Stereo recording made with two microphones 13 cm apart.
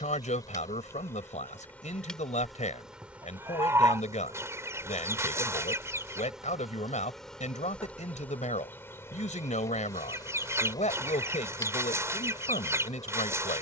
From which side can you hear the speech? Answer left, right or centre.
left.